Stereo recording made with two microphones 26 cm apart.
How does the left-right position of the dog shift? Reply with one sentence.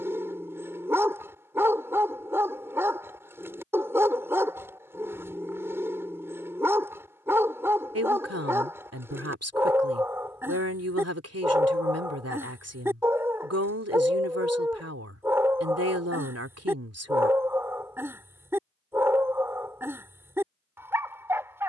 In this clip you hear the dog stay in one place.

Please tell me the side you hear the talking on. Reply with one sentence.
You can hear the talking on the right.